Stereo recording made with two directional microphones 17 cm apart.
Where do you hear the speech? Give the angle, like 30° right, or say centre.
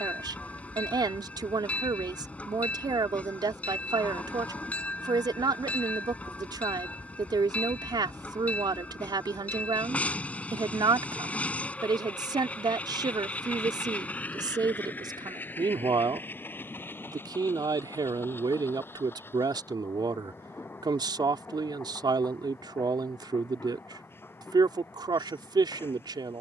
20° right.